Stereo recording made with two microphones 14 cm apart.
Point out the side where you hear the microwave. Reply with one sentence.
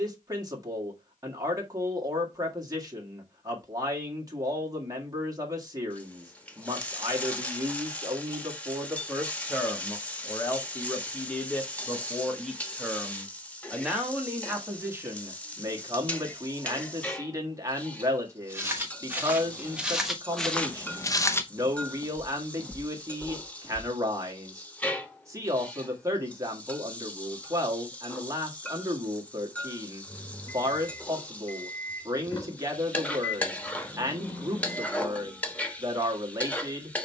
You can hear the microwave on the left.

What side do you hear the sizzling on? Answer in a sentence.
You can hear the sizzling in the centre.